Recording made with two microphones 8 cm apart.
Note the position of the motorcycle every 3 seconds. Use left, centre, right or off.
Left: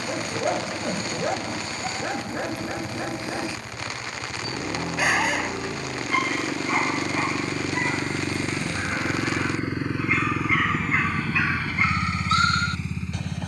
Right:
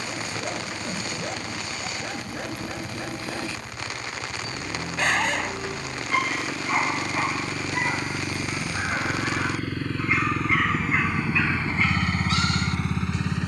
left, left, left, centre, right.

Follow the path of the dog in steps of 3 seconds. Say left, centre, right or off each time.
left, centre, centre, centre, left.